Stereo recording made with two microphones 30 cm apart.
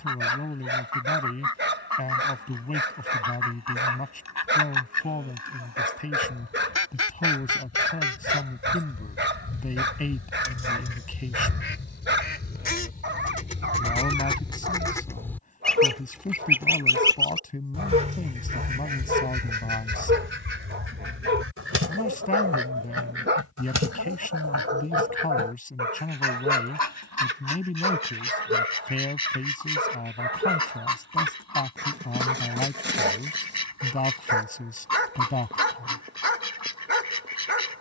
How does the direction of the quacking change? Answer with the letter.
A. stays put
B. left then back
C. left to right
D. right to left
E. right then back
C.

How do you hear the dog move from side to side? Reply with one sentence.
You can hear the dog stay in one place.